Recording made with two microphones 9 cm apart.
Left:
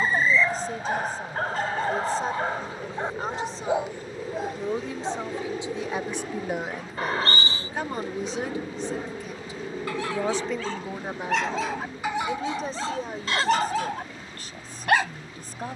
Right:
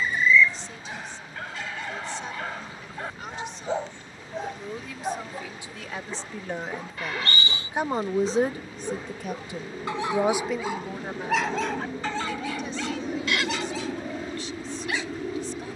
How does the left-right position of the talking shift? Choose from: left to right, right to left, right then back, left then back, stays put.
right then back.